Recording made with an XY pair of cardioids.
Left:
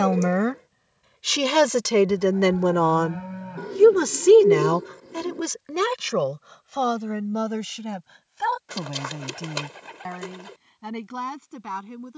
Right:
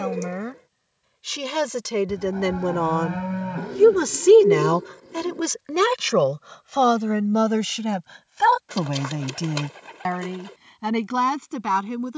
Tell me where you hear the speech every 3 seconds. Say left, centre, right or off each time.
left, centre, right, right.